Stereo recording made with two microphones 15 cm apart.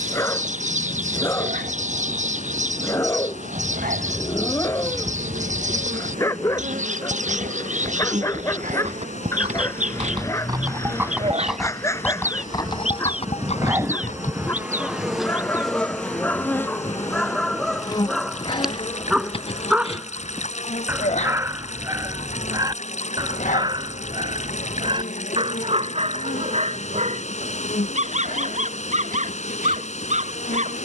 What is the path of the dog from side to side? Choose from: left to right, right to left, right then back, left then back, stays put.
left to right.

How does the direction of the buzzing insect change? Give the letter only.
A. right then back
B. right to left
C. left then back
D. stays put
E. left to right
B.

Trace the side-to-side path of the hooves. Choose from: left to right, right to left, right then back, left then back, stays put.
right to left.